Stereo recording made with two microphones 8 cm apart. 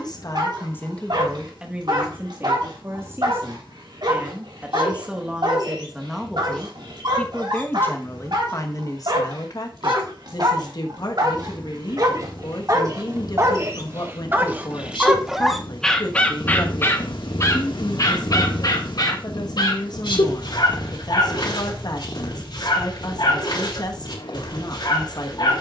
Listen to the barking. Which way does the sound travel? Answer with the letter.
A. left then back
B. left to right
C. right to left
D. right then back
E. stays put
C.